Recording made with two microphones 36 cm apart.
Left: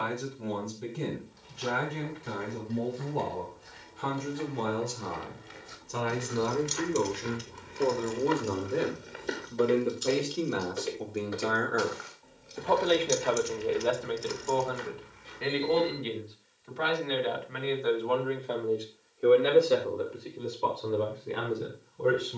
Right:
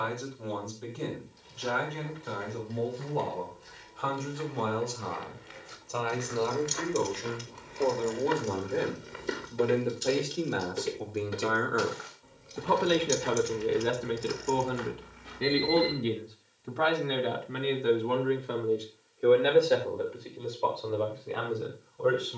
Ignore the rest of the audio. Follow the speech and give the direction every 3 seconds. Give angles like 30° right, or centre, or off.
40° left, 30° left, 20° left, centre, 30° right, 50° right, centre, 30° left.